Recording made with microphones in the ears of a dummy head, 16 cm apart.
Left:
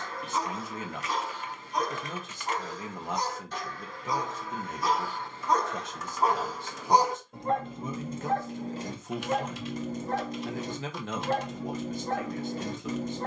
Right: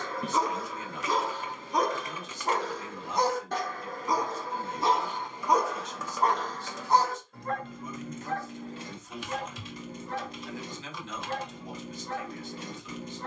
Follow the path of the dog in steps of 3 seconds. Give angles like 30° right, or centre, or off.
60° right, 30° right, 20° left, 40° left, 40° left.